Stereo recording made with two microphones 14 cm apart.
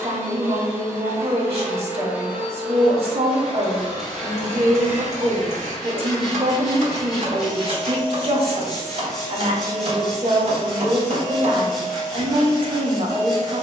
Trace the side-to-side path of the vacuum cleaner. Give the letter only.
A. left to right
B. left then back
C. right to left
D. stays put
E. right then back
C.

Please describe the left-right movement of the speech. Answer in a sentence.
In this clip you hear the speech stay put.